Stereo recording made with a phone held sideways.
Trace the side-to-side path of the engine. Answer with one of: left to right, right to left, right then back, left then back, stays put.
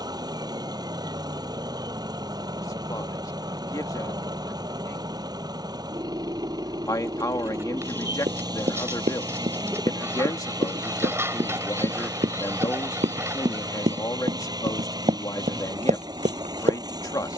stays put.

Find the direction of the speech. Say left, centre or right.
left.